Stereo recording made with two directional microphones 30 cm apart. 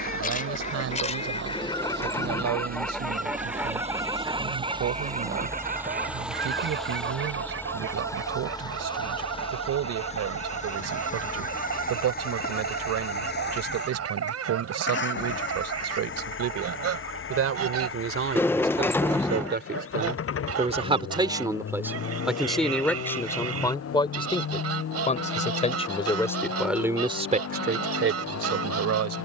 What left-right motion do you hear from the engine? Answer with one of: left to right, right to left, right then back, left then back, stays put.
right to left.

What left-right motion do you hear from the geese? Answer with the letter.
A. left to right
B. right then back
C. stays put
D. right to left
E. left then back
A.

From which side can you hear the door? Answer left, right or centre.
centre.